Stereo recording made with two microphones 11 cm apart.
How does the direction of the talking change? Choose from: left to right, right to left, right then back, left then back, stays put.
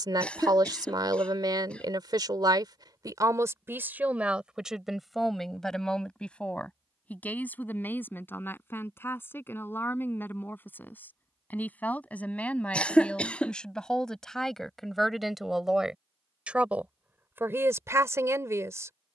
left then back.